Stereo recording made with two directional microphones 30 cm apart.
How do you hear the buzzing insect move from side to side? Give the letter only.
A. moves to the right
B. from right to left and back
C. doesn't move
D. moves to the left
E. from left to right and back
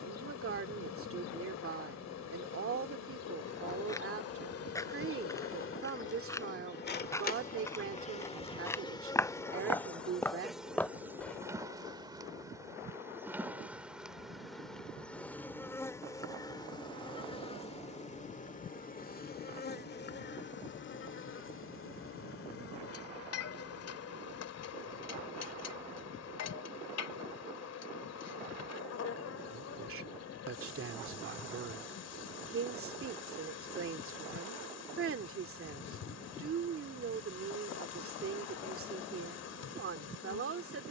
E.